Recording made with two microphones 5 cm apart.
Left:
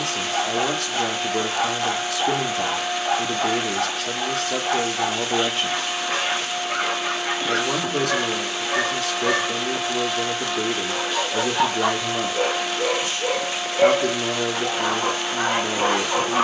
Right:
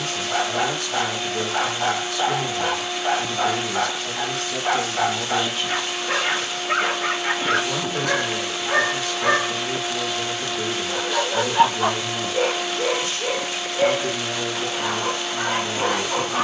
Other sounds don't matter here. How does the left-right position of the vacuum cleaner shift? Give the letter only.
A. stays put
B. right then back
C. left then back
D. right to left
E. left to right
A.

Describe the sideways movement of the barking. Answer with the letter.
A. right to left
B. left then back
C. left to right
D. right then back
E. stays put
A.